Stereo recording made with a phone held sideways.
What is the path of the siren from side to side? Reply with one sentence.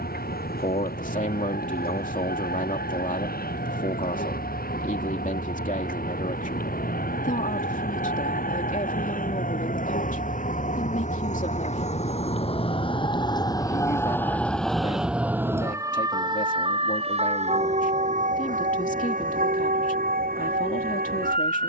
In this clip you hear the siren move from left to right.